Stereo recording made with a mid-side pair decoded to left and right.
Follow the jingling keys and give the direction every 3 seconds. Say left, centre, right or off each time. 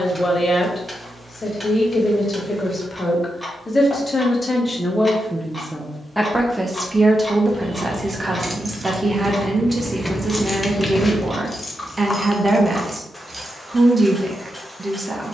off, off, right, centre, centre.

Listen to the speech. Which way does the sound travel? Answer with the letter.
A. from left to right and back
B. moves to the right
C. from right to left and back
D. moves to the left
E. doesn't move
B.